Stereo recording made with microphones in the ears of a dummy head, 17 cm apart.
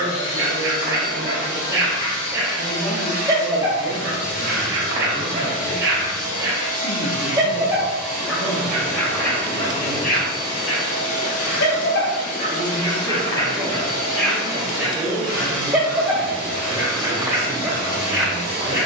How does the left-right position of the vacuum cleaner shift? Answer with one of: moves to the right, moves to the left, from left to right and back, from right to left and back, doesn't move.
doesn't move.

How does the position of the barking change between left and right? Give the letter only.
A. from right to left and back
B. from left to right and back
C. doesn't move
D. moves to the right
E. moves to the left
A.